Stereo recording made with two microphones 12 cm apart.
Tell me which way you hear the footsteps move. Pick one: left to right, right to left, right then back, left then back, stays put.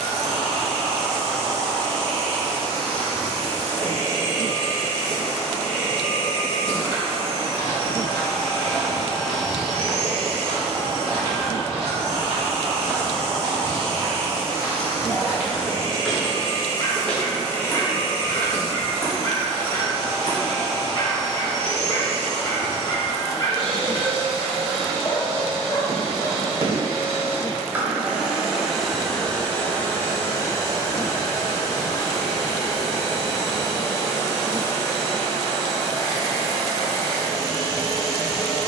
right then back.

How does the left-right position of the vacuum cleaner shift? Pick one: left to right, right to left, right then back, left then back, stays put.
right to left.